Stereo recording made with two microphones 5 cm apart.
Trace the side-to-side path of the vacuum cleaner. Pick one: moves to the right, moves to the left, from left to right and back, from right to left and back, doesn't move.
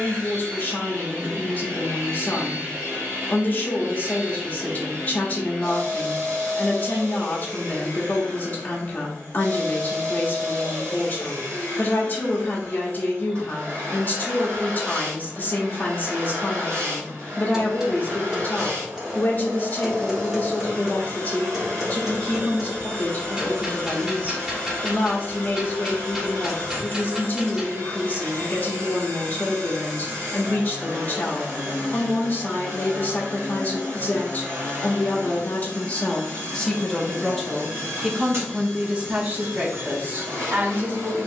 doesn't move.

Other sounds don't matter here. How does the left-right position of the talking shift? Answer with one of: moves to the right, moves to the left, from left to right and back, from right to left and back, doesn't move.
moves to the right.